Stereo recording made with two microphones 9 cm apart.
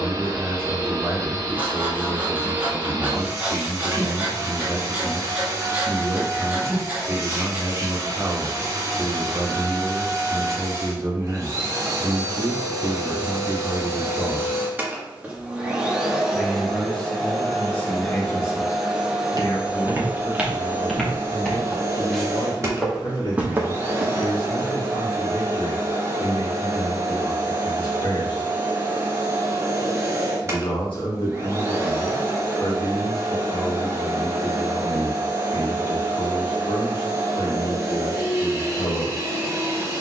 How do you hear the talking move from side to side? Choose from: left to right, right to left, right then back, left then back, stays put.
right to left.